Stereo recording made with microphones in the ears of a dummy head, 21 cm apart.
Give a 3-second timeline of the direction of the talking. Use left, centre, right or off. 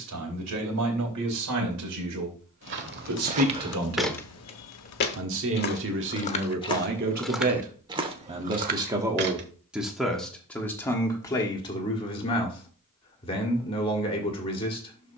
right, right, right, centre, left.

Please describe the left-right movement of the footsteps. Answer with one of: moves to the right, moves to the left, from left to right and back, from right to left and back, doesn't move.
from right to left and back.